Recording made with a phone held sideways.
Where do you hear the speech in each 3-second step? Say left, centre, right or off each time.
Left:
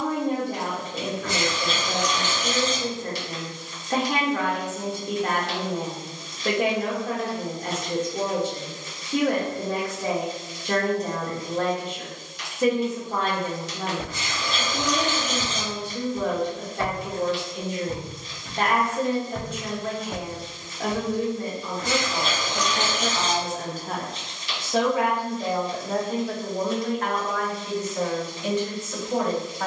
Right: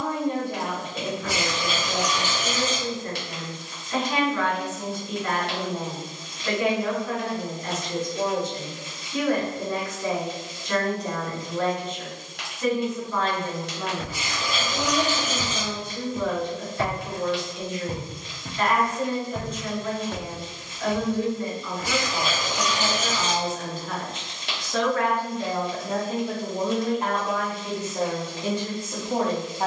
left, left, left, left, left, left, left, left, centre, right.